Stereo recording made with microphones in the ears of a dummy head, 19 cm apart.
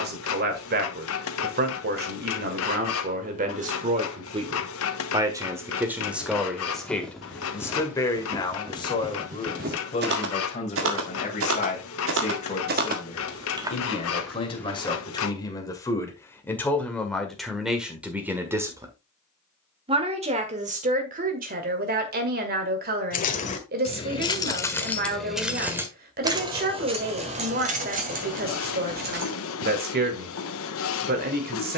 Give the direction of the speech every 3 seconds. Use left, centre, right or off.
right, right, centre, left, left, centre, right, right, right, right, right.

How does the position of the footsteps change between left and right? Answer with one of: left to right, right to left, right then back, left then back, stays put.
right then back.